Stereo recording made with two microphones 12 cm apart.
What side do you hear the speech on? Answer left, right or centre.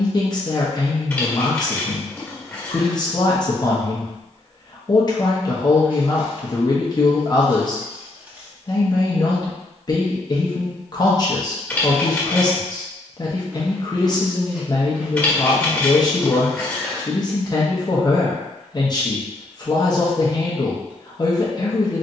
left.